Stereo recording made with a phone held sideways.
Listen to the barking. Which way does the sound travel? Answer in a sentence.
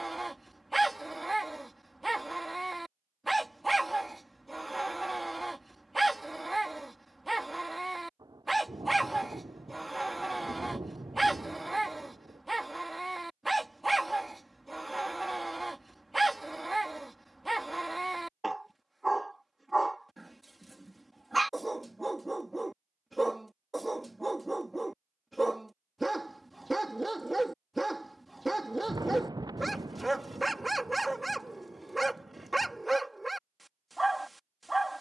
You can hear the barking stay in one place.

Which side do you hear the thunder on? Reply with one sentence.
You can hear the thunder on the right.